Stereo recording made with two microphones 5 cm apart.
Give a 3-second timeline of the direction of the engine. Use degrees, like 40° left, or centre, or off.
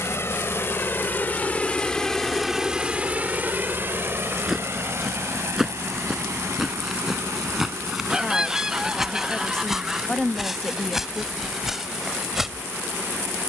20° left, 50° right, 70° right, 80° right, 80° right.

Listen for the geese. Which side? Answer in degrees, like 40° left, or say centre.
10° right.